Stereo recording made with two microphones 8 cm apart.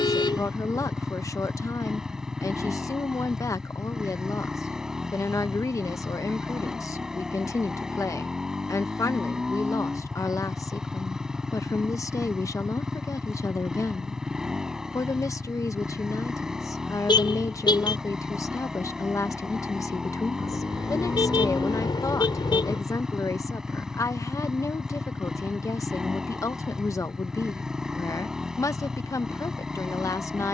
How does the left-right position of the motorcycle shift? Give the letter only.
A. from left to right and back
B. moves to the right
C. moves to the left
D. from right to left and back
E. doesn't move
E.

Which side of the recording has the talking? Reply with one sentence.
In this clip you hear the talking on the left.